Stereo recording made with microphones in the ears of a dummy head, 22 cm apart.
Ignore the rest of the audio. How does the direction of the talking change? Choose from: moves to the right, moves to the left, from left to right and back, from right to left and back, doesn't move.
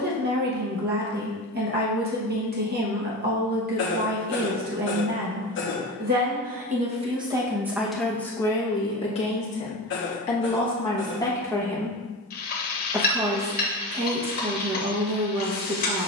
from right to left and back.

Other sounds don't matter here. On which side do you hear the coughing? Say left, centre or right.
left.